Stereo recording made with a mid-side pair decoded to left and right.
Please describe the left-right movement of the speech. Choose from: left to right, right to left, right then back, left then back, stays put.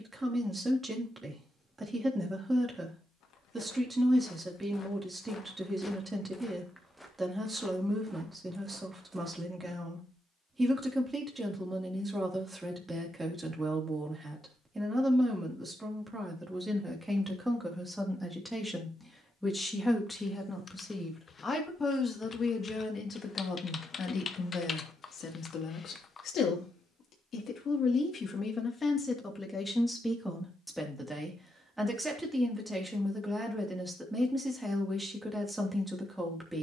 left then back.